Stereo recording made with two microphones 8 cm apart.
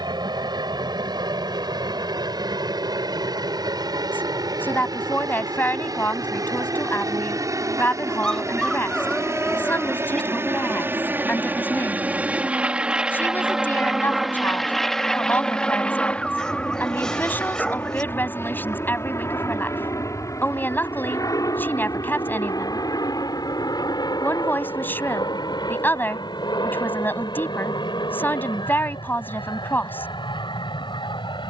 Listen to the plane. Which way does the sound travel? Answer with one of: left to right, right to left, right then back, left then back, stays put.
right to left.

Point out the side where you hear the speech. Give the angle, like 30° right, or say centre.
20° left.